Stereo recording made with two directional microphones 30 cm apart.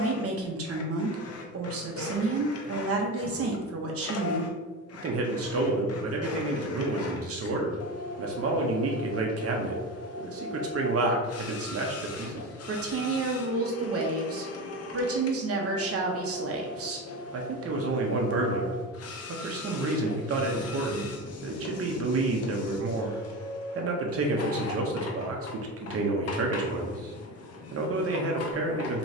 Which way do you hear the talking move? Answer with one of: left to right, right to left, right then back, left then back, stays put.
stays put.